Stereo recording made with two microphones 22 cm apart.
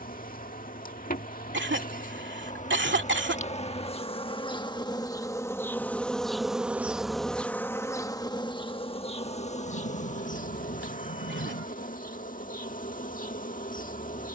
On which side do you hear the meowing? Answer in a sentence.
In this clip you hear the meowing on the left.